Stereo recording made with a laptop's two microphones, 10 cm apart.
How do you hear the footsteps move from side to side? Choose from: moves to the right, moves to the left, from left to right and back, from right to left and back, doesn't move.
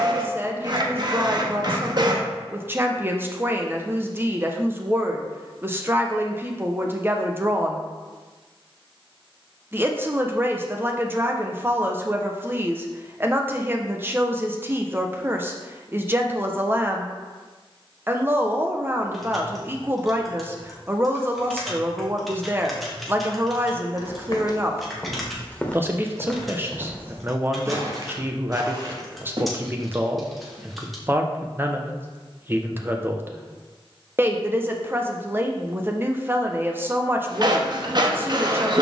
moves to the right.